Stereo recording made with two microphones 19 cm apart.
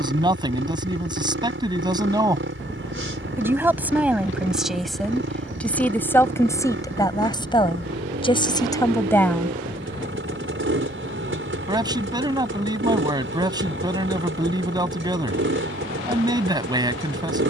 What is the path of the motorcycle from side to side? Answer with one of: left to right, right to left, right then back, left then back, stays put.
stays put.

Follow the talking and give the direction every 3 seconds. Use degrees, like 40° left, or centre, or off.
20° right, centre, 20° left, centre, 20° right, 20° right.